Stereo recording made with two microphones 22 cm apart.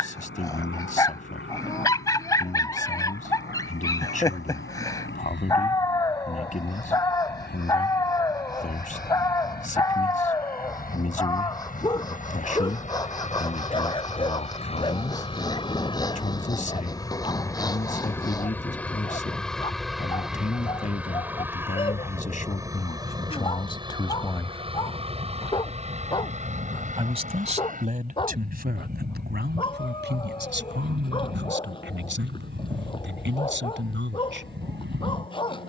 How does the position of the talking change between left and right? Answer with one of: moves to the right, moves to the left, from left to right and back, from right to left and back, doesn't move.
moves to the right.